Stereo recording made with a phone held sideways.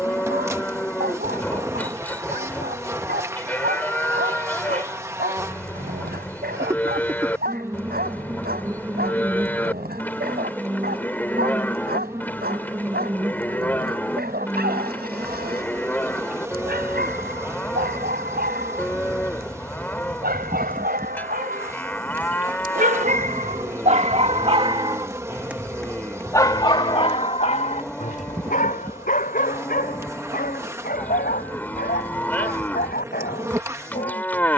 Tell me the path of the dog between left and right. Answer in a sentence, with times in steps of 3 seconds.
In this clip you hear the dog on the right from 0 s, in the centre from 24 s and on the left from 27 s.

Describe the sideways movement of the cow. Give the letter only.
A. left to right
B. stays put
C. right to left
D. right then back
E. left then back
B.